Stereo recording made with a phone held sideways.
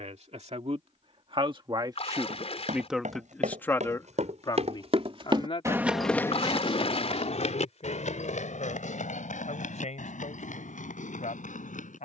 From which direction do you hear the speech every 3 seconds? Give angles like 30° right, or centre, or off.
40° right, 30° left, 60° left, 70° left.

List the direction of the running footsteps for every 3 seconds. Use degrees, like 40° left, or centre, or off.
80° right, 50° right, 60° left, 80° left.